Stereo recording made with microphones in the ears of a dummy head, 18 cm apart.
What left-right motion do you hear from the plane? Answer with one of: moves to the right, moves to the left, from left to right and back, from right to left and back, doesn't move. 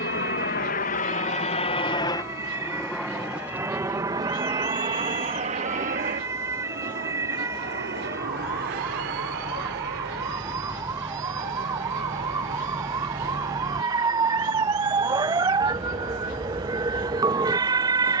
moves to the right.